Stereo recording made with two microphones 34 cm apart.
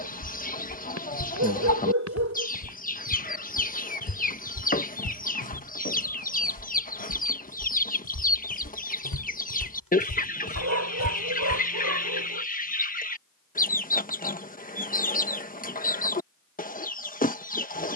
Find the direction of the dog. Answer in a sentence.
You can hear the dog on the right.